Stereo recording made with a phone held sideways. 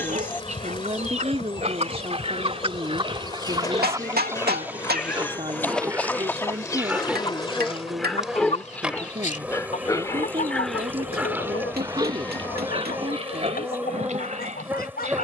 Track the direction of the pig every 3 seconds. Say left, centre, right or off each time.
right, right, centre, centre, right.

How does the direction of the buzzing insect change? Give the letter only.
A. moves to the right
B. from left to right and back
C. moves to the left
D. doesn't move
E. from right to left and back
A.